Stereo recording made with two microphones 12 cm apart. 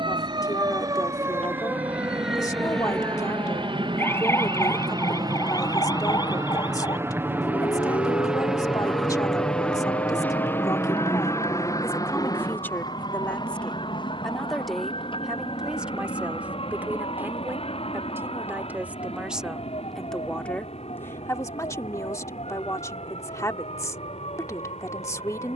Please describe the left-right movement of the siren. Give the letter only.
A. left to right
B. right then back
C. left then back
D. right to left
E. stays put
D.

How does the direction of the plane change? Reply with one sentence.
You can hear the plane travel towards the left.